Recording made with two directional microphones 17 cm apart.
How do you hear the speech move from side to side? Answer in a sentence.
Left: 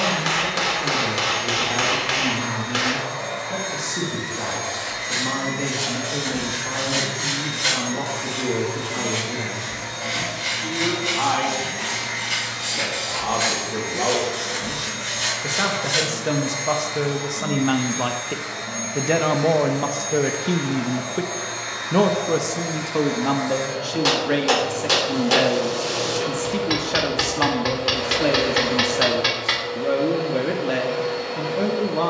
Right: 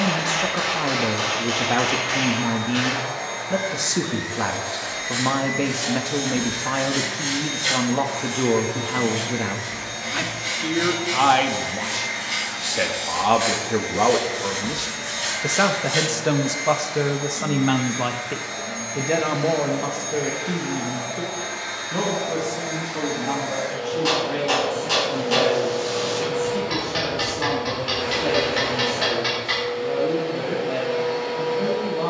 In this clip you hear the speech go from the right side to the left.